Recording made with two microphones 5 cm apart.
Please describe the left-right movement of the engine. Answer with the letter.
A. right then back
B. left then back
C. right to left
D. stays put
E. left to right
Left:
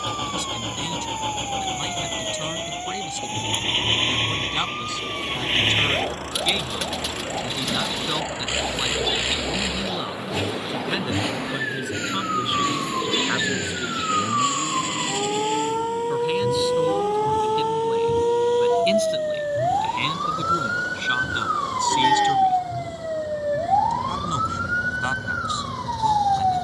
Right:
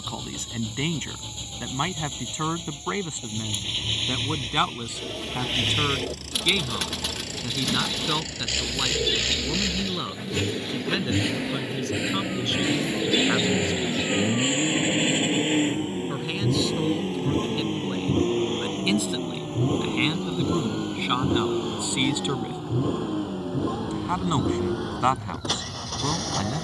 E.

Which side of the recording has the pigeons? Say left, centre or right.
centre.